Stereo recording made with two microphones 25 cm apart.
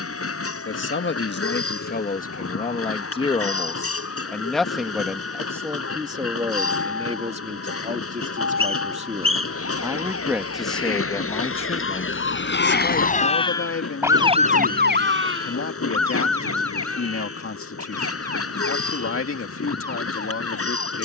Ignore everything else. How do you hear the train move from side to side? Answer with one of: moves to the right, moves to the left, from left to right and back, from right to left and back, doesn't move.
doesn't move.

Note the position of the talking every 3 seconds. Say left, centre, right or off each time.
left, centre, right, centre, left, left, left.